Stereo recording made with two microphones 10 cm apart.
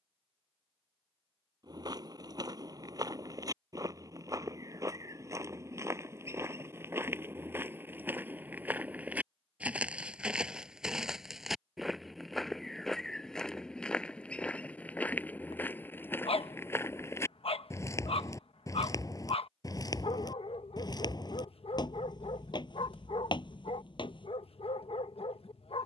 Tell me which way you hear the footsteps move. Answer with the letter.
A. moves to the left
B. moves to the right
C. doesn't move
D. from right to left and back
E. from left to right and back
A.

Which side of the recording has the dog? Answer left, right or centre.
left.